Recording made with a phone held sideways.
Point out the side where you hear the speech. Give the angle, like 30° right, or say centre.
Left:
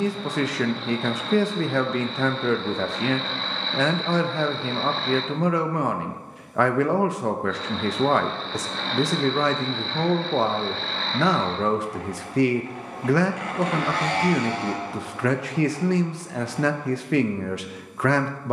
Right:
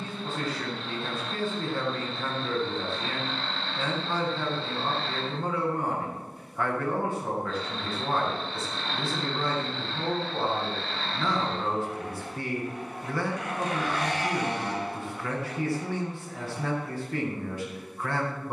80° left.